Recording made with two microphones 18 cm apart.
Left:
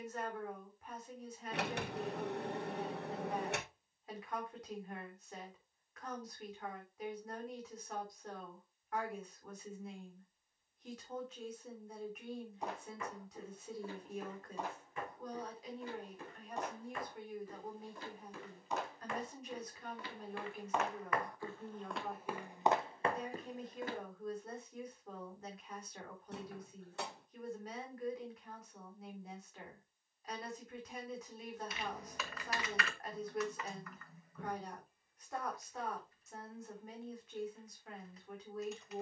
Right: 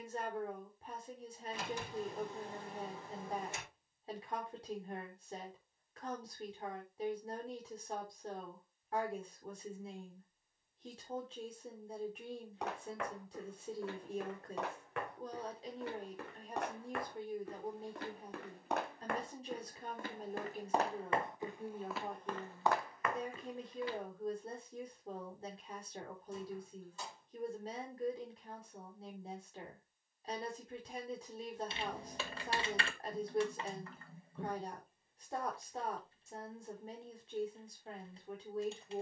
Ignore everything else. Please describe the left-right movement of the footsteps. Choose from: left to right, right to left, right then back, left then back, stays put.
right to left.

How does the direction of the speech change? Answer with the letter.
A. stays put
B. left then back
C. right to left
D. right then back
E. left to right
A.